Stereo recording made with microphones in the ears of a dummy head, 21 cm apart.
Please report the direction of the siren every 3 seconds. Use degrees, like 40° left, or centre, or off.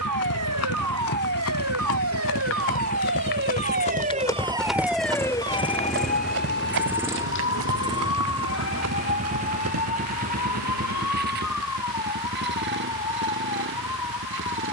70° right, 20° right, 50° left, 70° left, 70° left.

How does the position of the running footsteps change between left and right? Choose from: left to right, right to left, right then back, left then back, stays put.
left to right.